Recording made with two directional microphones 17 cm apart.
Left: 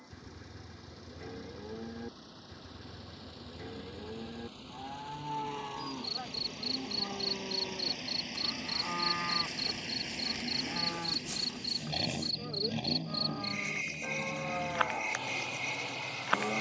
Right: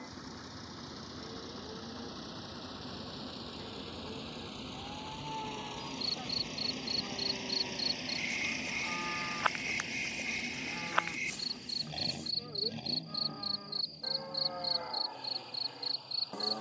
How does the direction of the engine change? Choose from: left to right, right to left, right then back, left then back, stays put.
right to left.